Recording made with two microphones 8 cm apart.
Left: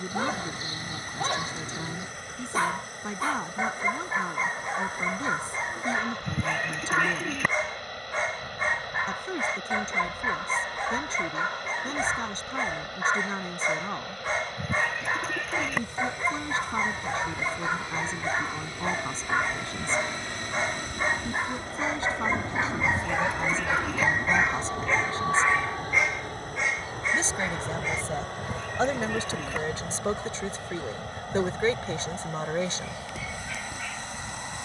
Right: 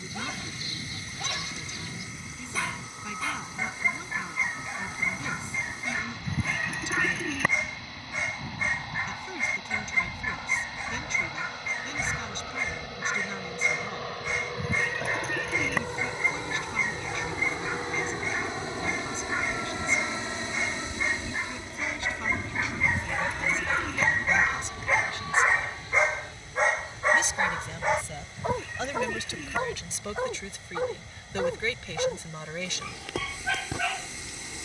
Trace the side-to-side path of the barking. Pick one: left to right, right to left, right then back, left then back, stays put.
left to right.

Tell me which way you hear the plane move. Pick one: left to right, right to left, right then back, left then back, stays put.
right to left.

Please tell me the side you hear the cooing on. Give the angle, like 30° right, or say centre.
centre.